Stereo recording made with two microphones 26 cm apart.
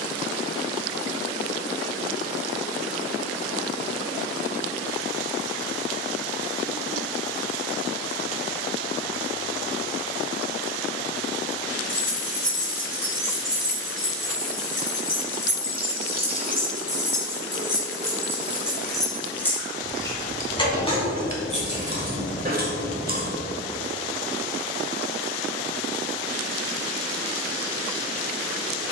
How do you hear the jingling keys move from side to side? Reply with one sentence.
You can hear the jingling keys go from the right side to the left.